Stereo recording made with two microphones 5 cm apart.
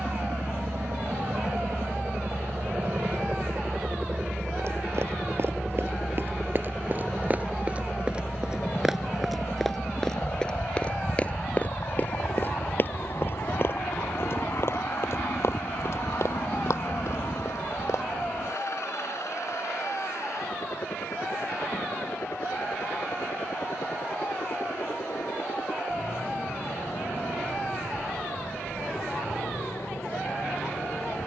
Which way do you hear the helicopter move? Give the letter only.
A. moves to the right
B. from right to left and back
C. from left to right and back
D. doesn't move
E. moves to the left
E.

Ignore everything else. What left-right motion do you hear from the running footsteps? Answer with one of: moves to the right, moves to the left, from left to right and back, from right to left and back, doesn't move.
moves to the left.